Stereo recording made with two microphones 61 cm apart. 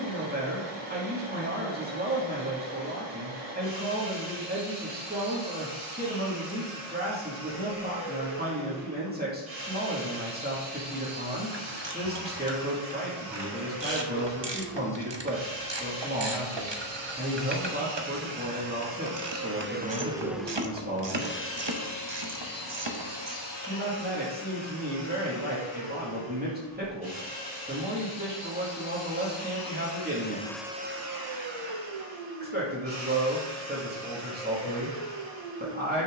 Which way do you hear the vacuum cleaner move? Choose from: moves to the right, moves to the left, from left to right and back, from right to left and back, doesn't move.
from right to left and back.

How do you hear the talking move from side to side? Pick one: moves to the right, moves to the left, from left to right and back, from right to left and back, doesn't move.
doesn't move.